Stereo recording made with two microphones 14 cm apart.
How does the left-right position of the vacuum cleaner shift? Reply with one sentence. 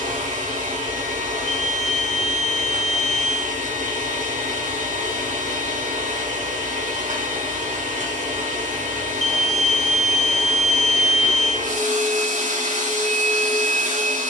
You can hear the vacuum cleaner stay put.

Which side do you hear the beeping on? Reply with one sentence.
You can hear the beeping on the left.